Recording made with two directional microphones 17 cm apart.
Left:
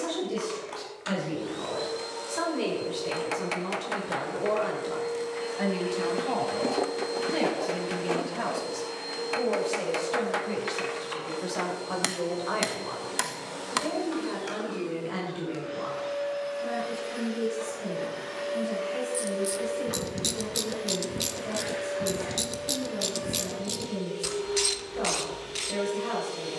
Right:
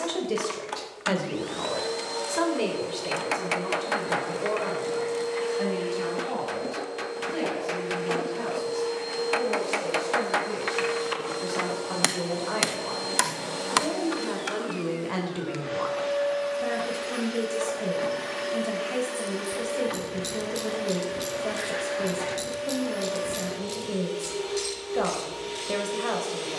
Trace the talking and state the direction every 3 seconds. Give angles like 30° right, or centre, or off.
40° right, centre, 30° left, 20° left, 20° right, 50° right, 60° right, 60° right, 60° right.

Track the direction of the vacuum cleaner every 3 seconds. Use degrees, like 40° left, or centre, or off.
40° right, 30° right, 20° left, 30° right, 40° right, 40° right, 40° right, 40° right, 40° right.